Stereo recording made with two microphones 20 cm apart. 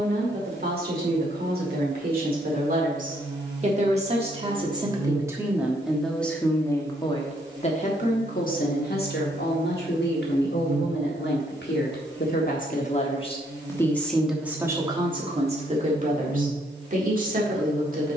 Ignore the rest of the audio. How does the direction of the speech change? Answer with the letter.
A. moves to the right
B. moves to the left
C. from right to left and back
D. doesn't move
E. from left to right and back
C.